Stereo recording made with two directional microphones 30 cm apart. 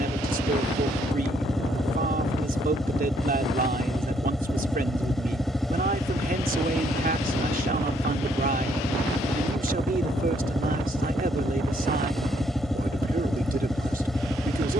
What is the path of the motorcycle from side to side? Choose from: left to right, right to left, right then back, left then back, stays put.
stays put.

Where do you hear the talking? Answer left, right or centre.
right.